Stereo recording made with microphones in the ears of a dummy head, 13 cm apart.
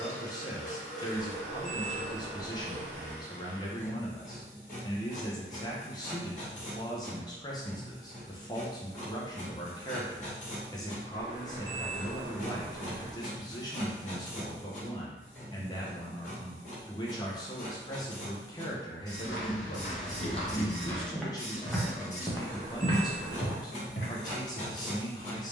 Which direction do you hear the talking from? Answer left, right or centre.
left.